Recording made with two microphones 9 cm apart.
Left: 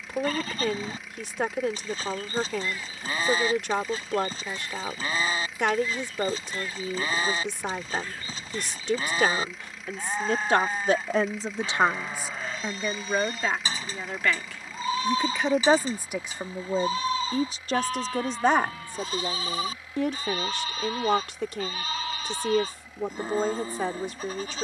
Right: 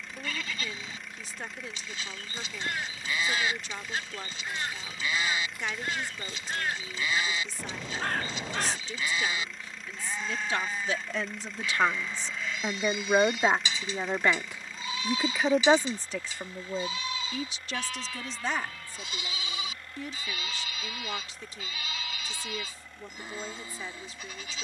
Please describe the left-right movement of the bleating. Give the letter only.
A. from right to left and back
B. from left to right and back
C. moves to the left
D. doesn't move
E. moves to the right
D.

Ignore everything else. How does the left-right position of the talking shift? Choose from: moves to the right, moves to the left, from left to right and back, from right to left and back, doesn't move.
from left to right and back.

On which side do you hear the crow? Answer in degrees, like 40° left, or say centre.
70° right.